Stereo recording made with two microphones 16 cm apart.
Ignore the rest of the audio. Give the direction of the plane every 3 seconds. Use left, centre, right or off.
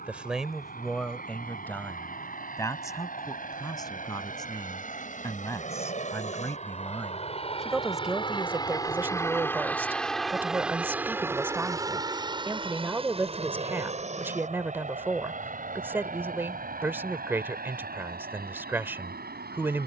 left, left, left, centre, right, right, right.